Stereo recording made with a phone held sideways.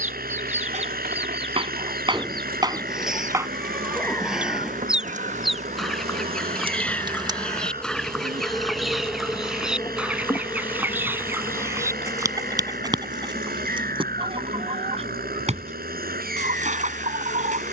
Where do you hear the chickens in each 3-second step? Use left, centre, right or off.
right, centre, centre, centre, right, right.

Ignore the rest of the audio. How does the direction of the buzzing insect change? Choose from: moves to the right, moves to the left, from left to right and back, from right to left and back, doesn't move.
moves to the left.